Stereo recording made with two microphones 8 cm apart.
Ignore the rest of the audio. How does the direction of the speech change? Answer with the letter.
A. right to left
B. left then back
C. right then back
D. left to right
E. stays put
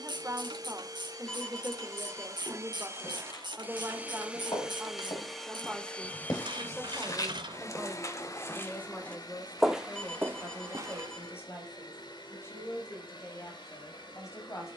A.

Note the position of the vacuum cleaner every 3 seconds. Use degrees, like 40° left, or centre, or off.
50° right, 10° right, 40° left, 60° left, 70° left.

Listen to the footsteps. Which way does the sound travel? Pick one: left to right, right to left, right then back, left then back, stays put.
left to right.